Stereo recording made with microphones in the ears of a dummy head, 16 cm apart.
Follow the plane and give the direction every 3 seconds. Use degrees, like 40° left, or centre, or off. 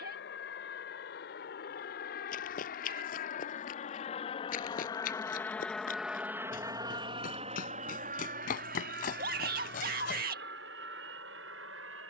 60° left, 30° left, 30° right, 60° right.